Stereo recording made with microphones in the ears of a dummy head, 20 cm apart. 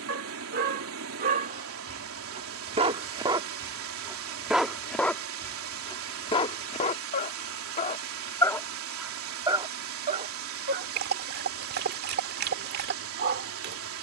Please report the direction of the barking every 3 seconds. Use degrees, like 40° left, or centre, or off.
40° right, centre, 30° left, 40° right, 50° right.